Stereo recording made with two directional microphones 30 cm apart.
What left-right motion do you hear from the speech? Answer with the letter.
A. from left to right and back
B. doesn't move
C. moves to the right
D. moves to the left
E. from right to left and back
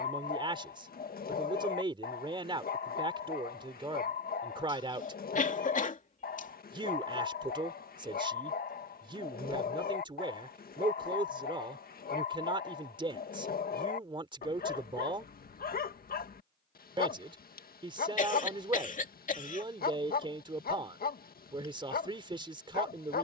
B.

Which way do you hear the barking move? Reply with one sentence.
You can hear the barking stay in one place.